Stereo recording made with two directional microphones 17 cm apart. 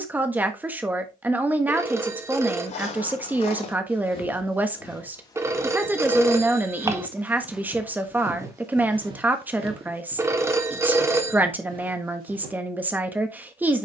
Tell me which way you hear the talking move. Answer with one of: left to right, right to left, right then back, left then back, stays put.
stays put.